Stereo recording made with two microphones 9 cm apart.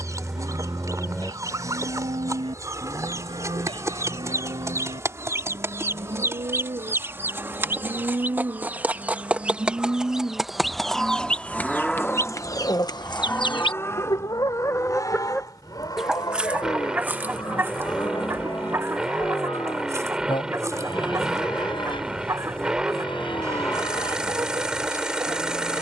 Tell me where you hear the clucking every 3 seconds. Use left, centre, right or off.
right, right, right, centre, left, centre, right, right, right.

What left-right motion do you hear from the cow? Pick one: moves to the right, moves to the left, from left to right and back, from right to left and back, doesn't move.
moves to the left.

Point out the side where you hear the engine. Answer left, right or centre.
centre.